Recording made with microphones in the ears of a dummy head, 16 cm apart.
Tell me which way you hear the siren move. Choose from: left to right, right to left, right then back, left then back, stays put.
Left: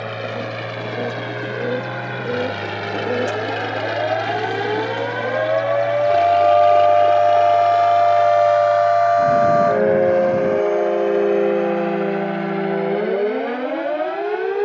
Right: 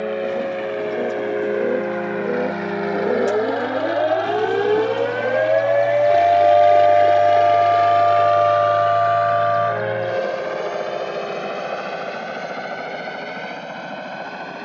right to left.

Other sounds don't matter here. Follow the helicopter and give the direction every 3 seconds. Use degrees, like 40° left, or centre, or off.
50° left, 20° left, 20° right, 40° right, 50° right.